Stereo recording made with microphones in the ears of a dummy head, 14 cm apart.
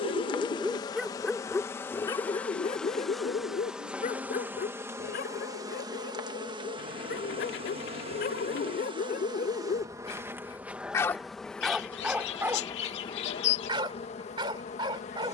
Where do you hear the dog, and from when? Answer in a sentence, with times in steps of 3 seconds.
In this clip you hear the dog in the centre from 0 s, on the left from 3 s and on the right from 12 s.